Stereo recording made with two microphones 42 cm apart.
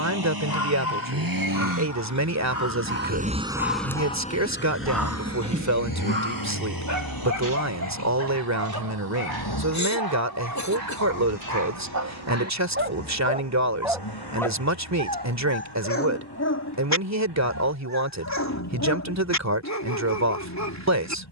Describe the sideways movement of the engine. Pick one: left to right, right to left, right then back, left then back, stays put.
right to left.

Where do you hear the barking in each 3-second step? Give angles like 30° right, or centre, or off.
50° left, 10° left, 50° right, 60° right, 20° right, 40° left, 40° left.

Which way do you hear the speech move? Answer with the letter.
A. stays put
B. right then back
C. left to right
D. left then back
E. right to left
A.